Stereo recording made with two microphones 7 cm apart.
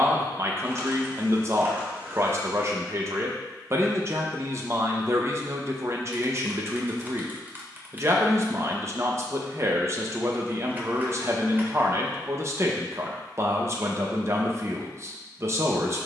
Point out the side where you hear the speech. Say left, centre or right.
right.